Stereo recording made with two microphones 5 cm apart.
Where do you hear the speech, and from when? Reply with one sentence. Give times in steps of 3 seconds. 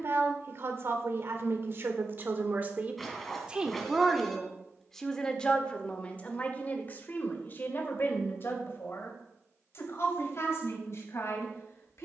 You can hear the speech on the right from 0 s, in the centre from 3 s and on the left from 6 s.